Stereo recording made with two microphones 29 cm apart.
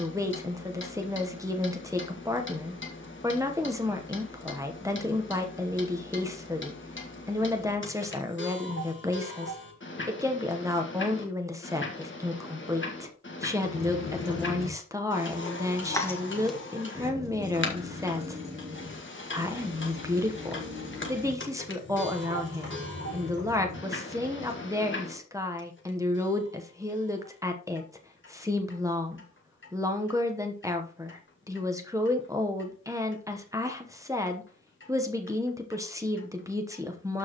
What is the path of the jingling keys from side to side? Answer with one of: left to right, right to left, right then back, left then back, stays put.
left to right.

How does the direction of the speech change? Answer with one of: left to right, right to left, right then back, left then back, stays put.
stays put.